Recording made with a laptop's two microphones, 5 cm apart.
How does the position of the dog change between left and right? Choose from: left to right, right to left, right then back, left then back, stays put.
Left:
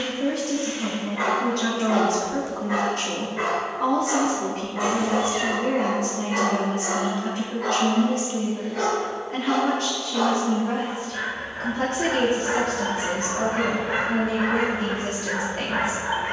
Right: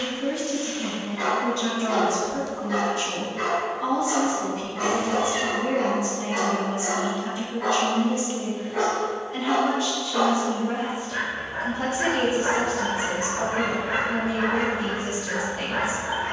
right then back.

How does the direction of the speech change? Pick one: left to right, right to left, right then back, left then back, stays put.
stays put.